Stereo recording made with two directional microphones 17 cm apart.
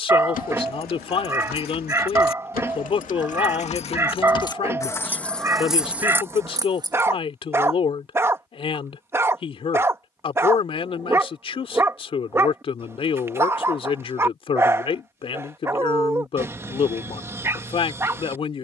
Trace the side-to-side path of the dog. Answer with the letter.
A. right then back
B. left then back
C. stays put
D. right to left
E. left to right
C.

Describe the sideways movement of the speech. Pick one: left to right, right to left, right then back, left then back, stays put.
stays put.